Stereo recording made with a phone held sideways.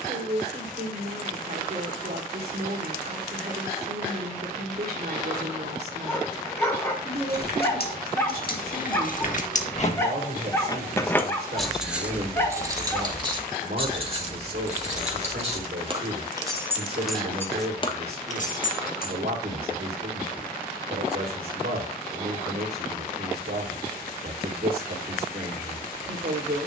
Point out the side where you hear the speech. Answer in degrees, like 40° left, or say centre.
70° right.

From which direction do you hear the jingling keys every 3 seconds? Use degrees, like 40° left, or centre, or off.
off, off, 70° left, 30° left, 30° right, 10° right, 60° left, off, off.